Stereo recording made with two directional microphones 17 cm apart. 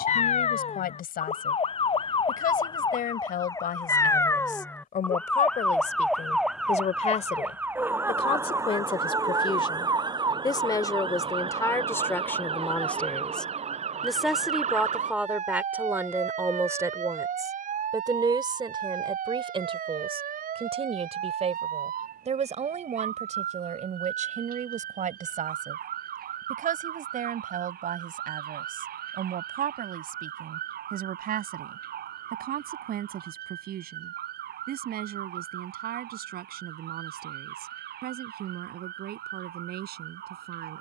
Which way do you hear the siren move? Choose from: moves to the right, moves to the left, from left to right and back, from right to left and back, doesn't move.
moves to the right.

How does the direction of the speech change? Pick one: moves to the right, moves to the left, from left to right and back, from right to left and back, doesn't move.
moves to the right.